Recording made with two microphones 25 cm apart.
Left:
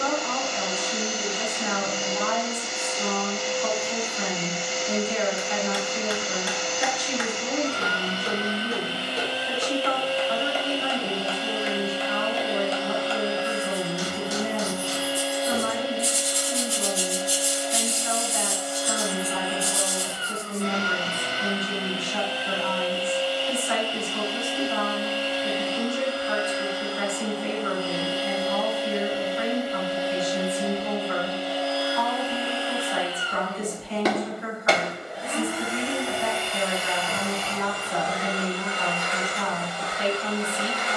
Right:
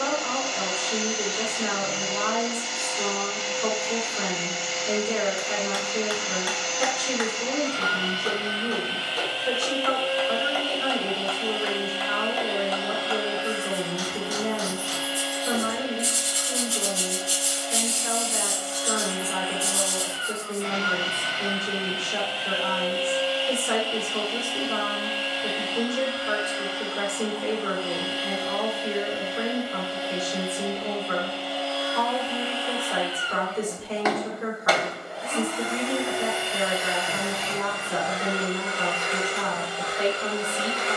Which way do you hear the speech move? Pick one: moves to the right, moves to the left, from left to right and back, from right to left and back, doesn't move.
doesn't move.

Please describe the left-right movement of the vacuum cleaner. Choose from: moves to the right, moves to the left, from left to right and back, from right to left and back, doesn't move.
moves to the right.